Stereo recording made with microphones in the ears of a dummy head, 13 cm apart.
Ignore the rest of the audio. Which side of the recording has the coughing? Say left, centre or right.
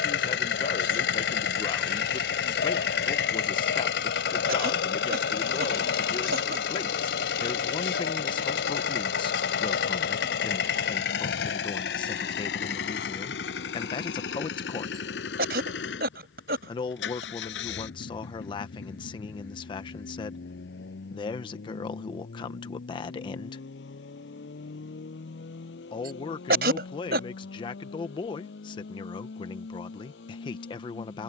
right.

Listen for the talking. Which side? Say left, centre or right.
left.